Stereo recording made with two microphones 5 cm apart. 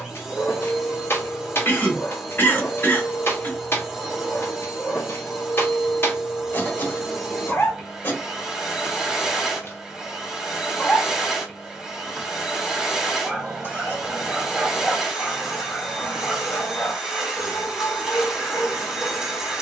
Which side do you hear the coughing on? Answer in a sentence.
You can hear the coughing on the left.